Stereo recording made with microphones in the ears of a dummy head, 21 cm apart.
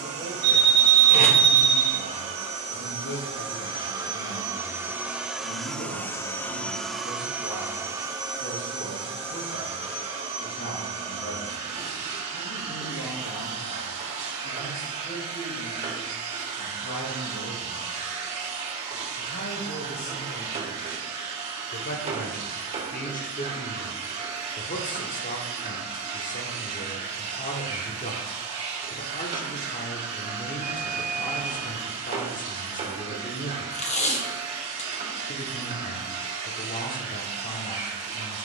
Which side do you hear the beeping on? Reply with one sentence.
In this clip you hear the beeping on the right.